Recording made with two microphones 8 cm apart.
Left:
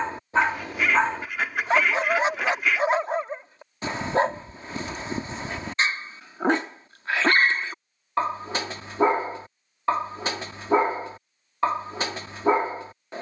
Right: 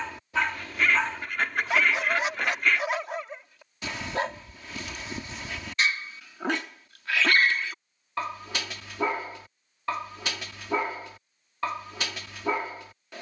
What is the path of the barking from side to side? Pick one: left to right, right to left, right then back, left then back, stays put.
stays put.